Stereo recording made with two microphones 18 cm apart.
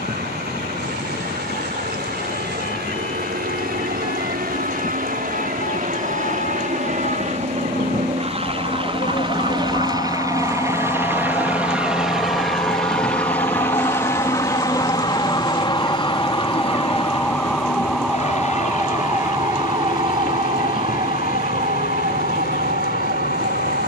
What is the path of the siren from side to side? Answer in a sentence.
In this clip you hear the siren move to the right.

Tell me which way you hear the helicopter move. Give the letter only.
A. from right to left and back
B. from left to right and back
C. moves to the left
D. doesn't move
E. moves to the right
C.